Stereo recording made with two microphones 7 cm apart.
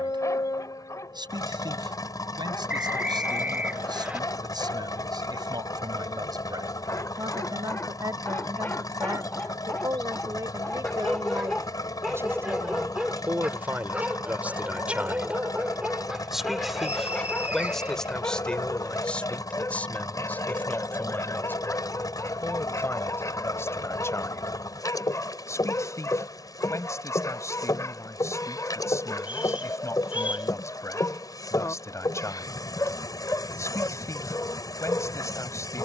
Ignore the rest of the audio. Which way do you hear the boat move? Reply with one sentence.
You can hear the boat stay in one place.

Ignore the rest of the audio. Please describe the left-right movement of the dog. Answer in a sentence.
In this clip you hear the dog move from left to right and back again.